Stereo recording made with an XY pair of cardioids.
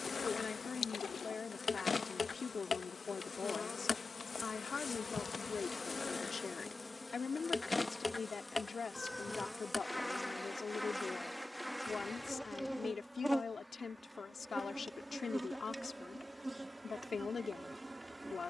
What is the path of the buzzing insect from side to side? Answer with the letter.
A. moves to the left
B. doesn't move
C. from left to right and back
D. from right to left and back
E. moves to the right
E.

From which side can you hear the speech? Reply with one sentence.
In this clip you hear the speech on the left.